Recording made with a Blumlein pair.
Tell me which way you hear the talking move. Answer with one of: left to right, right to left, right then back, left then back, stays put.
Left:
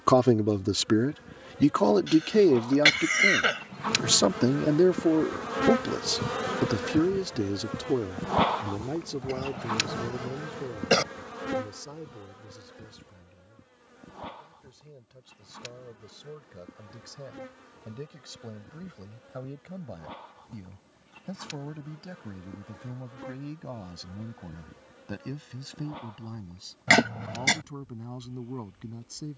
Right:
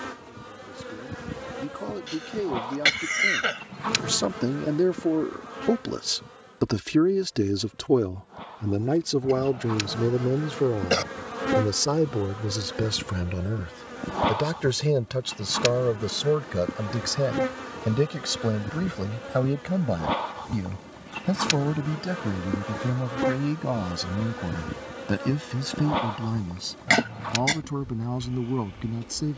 left to right.